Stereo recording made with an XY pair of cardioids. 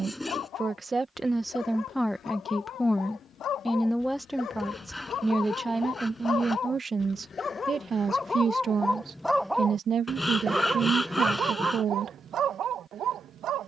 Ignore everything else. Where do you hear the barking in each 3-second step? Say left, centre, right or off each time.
left, left, left, right, right.